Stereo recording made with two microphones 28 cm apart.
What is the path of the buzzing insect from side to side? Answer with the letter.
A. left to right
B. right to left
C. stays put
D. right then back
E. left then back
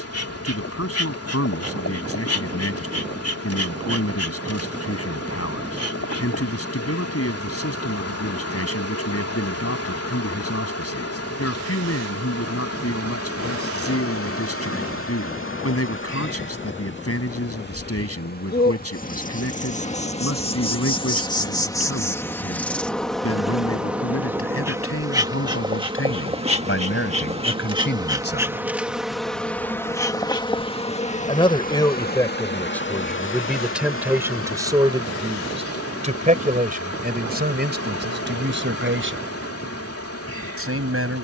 D.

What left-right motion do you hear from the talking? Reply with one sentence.
You can hear the talking move to the right.